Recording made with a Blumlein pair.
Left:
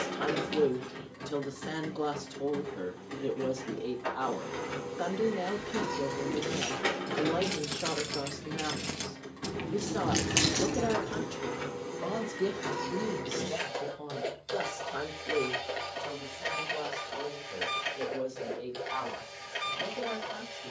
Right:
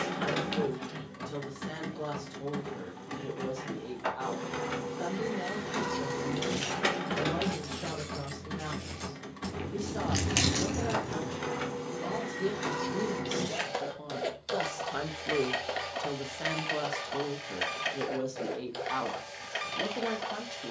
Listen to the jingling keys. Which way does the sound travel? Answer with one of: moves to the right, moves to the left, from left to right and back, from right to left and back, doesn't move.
from right to left and back.